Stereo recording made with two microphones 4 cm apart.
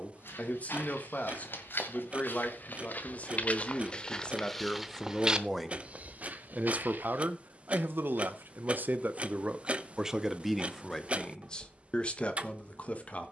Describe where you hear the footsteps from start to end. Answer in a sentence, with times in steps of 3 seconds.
You can hear the footsteps on the left from 0 s, in the centre from 3 s, on the right from 6 s and not at all from 9 s.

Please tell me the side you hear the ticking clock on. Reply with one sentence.
You can hear the ticking clock on the right.